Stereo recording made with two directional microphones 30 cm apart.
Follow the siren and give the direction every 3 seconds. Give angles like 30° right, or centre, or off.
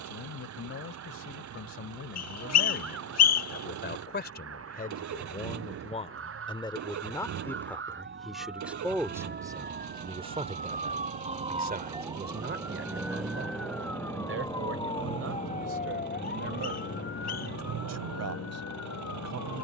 60° right, 50° right, 40° right, 30° right, centre, 30° left, 50° left.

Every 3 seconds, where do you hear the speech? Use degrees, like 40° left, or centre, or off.
50° left, 30° left, 10° left, 20° right, 40° right, 50° right, 60° right.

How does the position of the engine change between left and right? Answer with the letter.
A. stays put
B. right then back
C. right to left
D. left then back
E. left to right
A.